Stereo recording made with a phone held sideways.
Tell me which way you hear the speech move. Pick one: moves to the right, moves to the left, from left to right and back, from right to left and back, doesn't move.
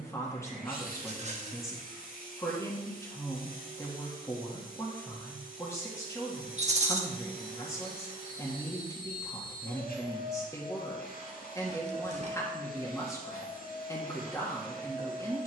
doesn't move.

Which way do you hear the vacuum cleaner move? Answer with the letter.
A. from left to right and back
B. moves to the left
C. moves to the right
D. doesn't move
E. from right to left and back
D.